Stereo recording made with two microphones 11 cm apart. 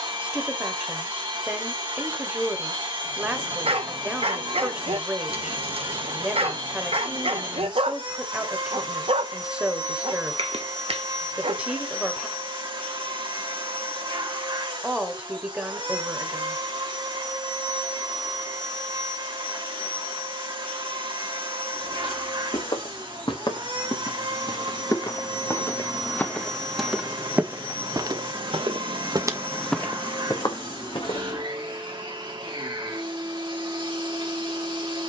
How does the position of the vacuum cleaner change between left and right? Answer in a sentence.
In this clip you hear the vacuum cleaner stay in one place.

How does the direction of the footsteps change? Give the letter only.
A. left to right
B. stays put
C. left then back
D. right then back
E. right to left
D.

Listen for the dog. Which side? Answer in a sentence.
In this clip you hear the dog on the right.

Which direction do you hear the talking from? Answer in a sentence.
In this clip you hear the talking in the centre.